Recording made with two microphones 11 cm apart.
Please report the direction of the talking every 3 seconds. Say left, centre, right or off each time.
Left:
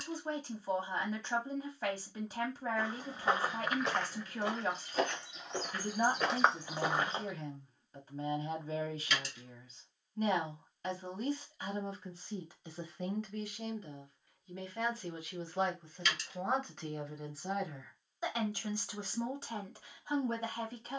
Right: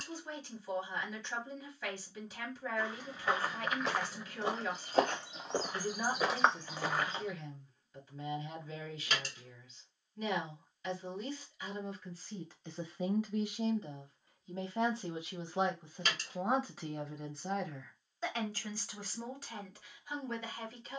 left, left, left, left, centre, centre, left.